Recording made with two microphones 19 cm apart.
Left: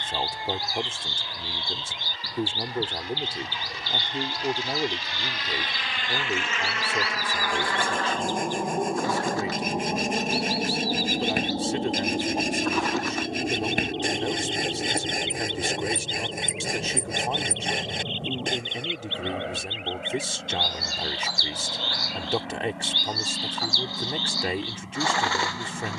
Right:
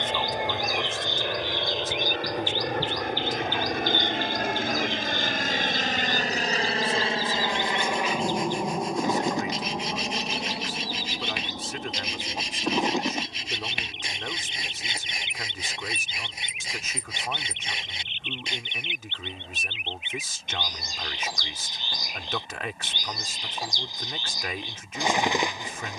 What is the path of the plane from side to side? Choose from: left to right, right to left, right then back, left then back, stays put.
right to left.